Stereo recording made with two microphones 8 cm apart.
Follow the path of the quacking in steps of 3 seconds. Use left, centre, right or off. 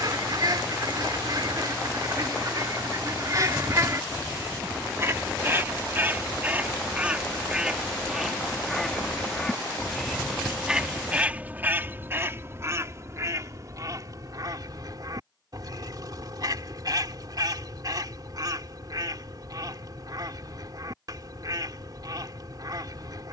right, right, centre, centre, right, right, right, right.